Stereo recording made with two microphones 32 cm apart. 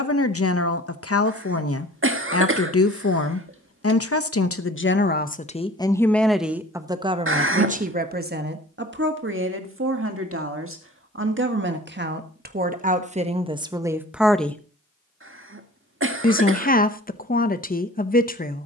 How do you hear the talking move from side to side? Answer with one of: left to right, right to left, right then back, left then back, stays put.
right then back.